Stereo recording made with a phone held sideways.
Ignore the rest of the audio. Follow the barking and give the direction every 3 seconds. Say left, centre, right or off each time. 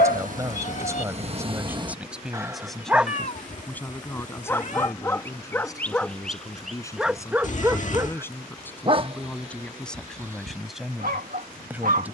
right, centre, centre, right.